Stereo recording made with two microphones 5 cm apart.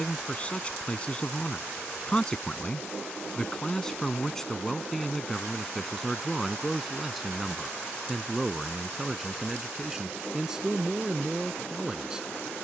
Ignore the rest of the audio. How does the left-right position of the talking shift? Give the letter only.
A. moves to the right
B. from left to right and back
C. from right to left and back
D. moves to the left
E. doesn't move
A.